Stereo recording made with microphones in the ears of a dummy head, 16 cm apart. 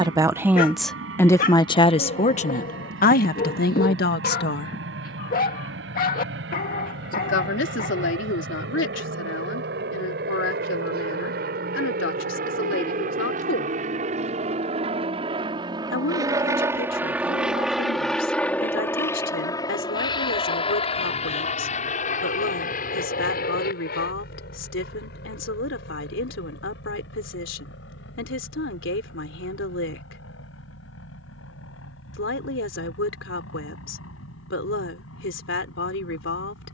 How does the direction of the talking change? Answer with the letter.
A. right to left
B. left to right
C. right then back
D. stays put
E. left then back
A.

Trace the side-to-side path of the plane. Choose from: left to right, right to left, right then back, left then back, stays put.
right to left.